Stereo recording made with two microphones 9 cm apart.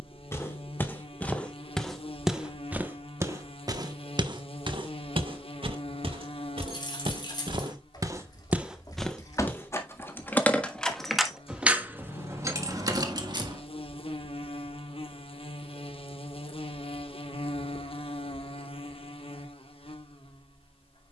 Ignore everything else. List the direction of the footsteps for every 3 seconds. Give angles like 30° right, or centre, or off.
10° left, 50° right, 50° right, 20° left, off, off, off.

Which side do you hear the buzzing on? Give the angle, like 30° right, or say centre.
80° left.